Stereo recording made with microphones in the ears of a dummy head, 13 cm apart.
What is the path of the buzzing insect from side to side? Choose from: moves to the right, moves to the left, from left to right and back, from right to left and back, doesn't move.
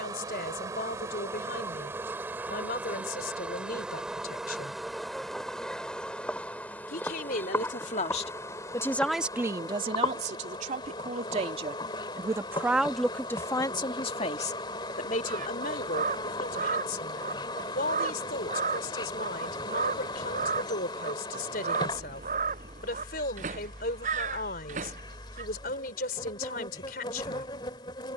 moves to the left.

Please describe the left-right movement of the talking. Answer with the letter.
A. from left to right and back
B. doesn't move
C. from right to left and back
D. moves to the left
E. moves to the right
A.